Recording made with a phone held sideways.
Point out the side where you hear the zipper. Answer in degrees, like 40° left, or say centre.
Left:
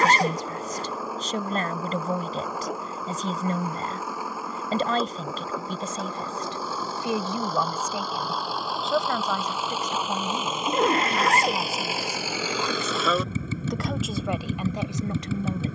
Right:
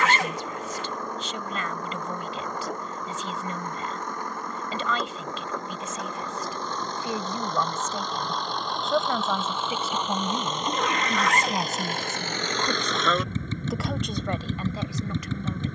40° left.